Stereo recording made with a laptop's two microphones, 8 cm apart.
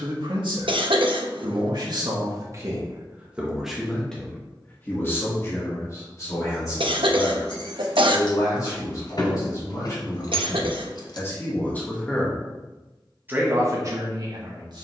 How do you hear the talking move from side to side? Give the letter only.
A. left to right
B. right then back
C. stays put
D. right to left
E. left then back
E.